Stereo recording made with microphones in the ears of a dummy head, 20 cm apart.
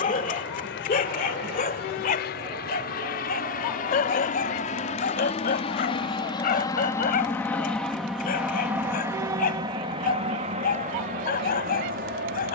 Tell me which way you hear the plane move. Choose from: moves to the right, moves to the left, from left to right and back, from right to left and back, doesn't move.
moves to the right.